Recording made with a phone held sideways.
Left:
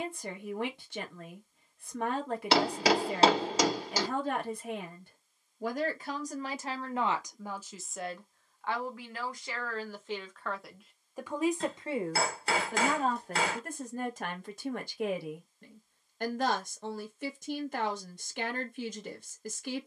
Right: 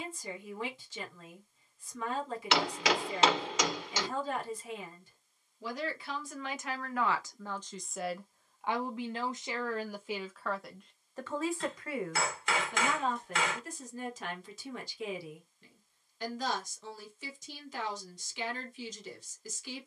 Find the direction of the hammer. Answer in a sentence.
In this clip you hear the hammer on the left.